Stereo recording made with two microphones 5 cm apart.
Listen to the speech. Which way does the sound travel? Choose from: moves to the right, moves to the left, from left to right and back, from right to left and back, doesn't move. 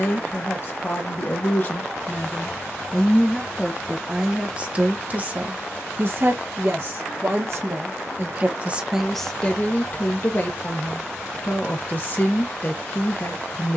from left to right and back.